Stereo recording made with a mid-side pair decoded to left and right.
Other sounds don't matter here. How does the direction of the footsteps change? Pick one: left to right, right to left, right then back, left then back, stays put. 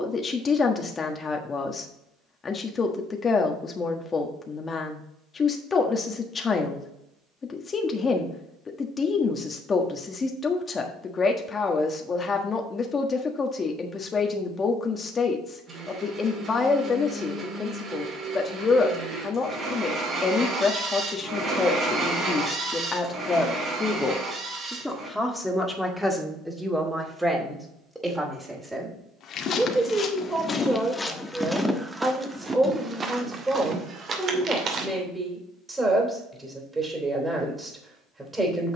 left to right.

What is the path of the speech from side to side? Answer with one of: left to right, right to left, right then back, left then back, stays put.
left to right.